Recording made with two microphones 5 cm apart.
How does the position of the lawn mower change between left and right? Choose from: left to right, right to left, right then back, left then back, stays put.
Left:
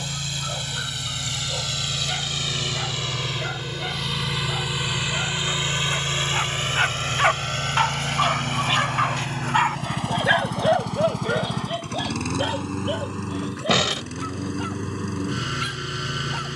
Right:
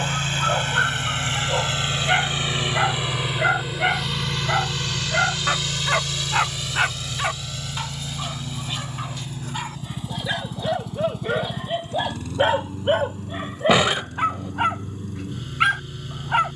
right to left.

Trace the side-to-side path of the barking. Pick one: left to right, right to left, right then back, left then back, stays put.
left then back.